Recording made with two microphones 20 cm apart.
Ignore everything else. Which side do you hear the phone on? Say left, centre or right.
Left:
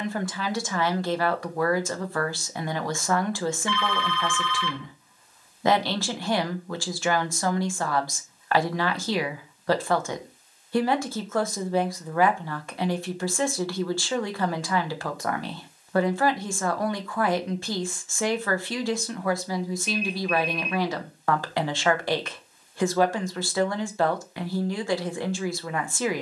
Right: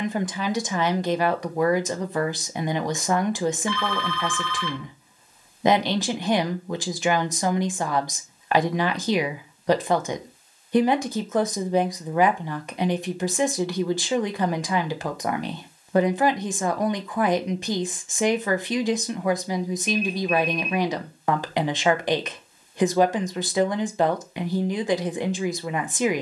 right.